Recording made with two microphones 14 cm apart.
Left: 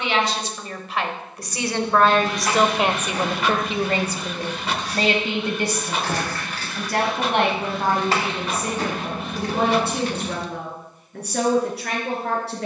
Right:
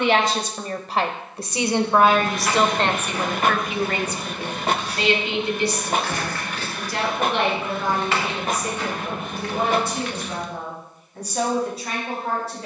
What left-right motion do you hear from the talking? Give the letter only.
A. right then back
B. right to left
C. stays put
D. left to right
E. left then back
B.